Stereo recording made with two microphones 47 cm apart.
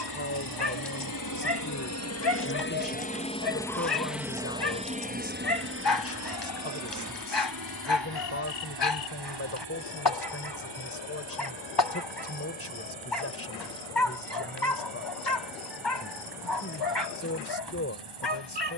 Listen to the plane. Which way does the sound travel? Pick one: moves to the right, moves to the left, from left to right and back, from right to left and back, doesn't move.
moves to the right.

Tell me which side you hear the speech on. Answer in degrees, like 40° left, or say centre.
30° left.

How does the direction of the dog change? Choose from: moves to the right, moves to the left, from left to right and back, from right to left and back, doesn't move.
doesn't move.